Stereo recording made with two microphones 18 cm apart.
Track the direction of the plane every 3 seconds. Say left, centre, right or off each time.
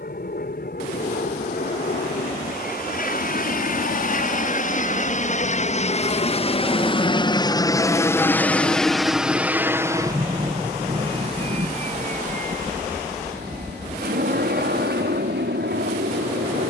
left, left, left, right, right, right.